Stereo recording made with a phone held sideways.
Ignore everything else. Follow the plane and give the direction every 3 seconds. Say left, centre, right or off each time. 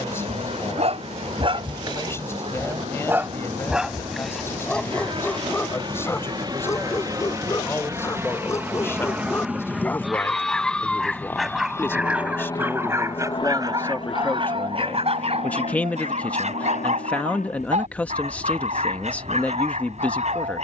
right, right, right, centre, left, left, left.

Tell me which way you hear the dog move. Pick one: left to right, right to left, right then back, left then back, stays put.
left then back.